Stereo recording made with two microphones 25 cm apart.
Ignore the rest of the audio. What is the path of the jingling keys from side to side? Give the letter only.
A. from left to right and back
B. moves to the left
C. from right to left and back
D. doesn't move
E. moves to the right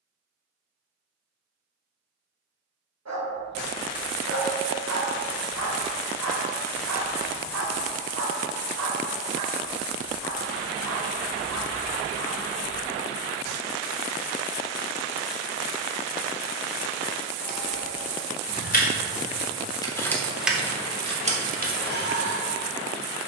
E.